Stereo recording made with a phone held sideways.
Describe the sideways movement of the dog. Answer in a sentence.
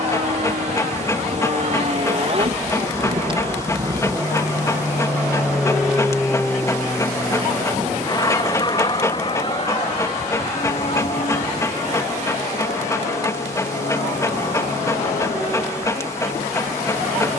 You can hear the dog stay put.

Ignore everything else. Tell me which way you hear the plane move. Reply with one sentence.
In this clip you hear the plane travel towards the left.